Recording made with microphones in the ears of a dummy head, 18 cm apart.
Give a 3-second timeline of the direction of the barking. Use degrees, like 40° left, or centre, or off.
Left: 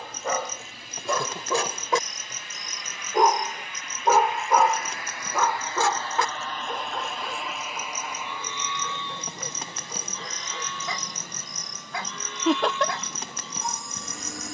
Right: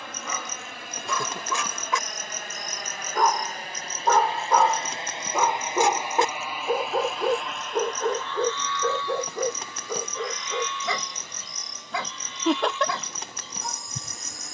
40° left, centre, 40° right, 60° right, 70° right.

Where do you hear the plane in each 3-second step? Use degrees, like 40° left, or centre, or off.
50° right, 30° right, centre, 30° left, 50° left.